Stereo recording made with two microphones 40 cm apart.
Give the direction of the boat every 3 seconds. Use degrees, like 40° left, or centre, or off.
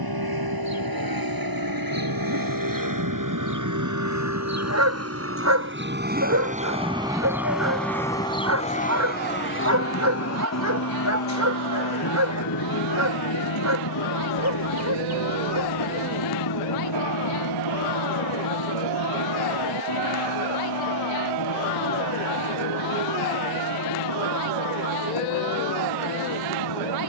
60° right, 40° right, centre, 40° left, 60° left, 70° left, 80° left, 80° left, 80° left.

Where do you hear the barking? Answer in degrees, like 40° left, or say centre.
40° right.